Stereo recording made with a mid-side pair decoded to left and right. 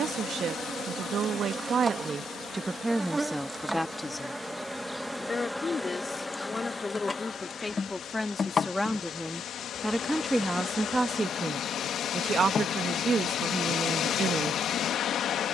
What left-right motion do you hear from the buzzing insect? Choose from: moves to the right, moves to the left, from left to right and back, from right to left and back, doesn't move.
moves to the left.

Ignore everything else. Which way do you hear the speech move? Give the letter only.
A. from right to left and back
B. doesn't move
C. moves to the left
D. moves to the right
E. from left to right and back
A.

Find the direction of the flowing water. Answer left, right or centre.
left.